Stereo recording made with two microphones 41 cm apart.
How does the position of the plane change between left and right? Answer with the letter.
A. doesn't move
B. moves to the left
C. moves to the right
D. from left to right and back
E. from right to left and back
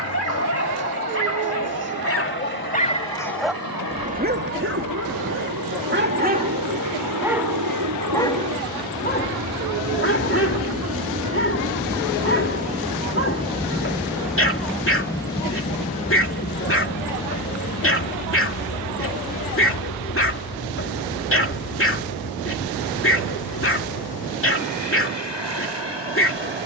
B.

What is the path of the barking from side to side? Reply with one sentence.
You can hear the barking move from left to right and back again.